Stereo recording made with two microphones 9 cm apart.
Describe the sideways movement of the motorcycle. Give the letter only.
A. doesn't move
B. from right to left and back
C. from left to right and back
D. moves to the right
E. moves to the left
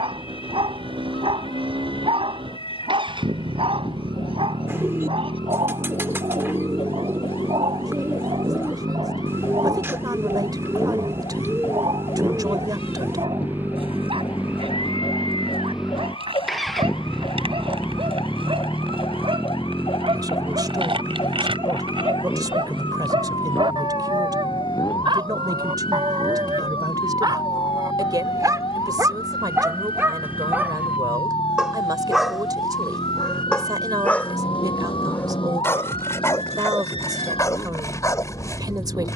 E.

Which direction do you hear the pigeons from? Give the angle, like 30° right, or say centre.
30° right.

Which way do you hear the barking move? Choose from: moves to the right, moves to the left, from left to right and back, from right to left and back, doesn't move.
moves to the left.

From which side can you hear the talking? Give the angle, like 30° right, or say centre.
50° right.